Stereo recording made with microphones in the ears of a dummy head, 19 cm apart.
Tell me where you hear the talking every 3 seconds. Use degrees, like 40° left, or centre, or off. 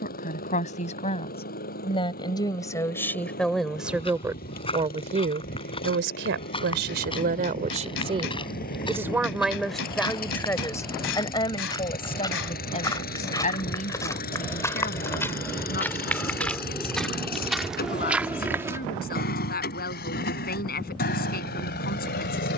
20° left, 10° right, 40° right, 10° left, 30° left, 40° left, 40° left, 40° left.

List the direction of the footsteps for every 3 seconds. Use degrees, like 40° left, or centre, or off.
off, 20° left, 20° left, 20° left, 20° left, centre, 10° right, off.